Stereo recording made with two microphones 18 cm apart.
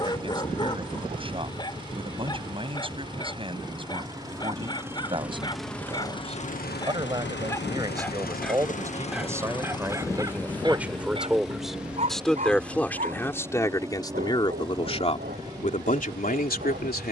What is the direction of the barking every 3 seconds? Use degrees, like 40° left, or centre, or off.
20° left, 20° left, 10° left, 20° right, 50° right, 60° right.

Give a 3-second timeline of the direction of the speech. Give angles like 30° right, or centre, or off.
30° right, 30° right, 20° right, 10° right, 20° left, 50° left.